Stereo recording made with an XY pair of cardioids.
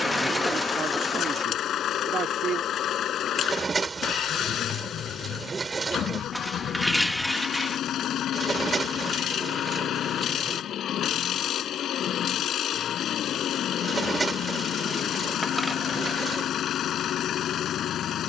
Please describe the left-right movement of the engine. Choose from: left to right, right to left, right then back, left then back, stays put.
stays put.